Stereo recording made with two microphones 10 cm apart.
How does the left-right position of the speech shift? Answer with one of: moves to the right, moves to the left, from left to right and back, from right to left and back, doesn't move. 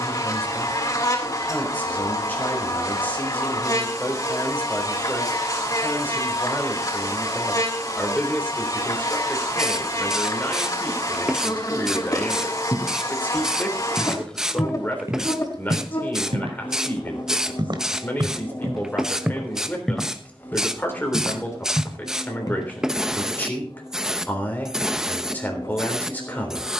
doesn't move.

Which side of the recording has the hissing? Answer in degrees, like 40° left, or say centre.
10° right.